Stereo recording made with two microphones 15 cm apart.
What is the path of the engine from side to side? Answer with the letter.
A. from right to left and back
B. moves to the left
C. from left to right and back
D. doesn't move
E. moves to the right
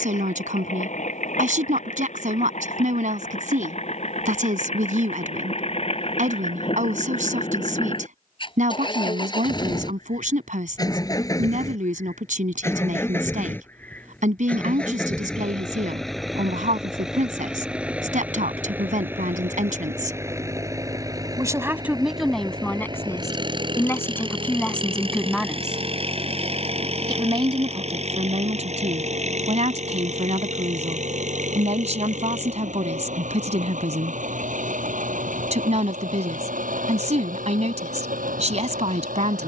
E.